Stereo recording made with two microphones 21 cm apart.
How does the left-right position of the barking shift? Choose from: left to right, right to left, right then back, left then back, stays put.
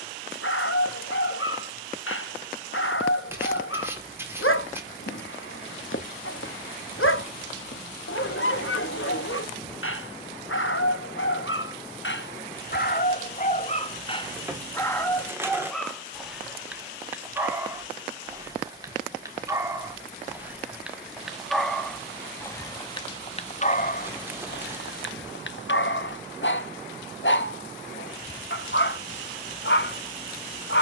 right then back.